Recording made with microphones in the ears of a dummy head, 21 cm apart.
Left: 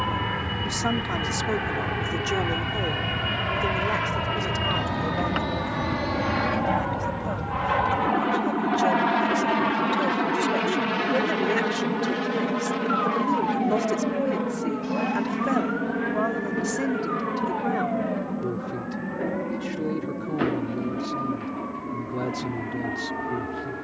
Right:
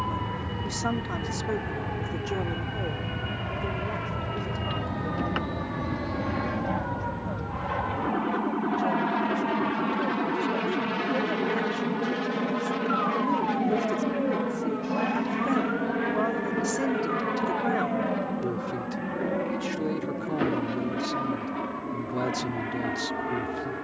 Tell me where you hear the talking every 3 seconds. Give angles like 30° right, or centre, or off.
20° left, 60° left, 70° left, 60° left, 30° left, centre, 20° right, 20° right.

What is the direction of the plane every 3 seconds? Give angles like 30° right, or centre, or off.
60° left, 50° left, 30° left, 20° left, 10° right, 30° right, 40° right, 50° right.